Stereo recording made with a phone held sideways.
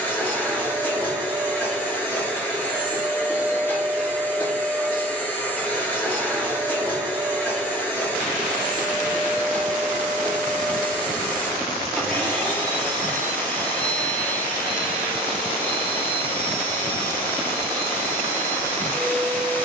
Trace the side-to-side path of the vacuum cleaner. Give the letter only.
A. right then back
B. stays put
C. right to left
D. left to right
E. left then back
B.